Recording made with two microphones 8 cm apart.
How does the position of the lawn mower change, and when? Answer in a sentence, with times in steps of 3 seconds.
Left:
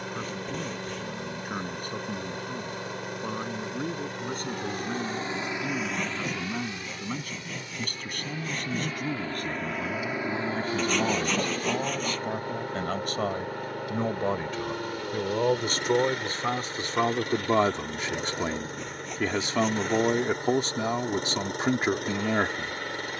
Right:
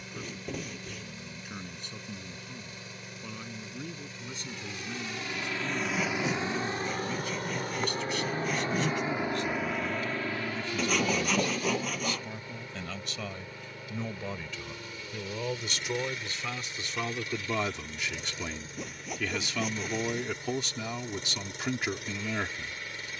You can hear the lawn mower on the left from 0 s, on the right from 6 s and on the left from 9 s.